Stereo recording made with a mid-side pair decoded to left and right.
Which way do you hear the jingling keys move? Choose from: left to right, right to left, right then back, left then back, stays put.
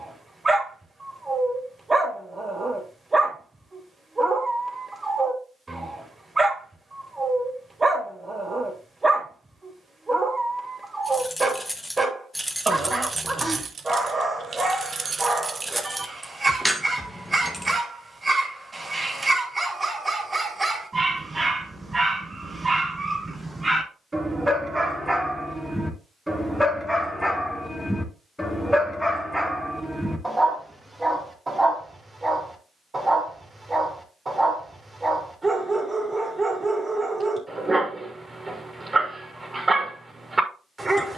right then back.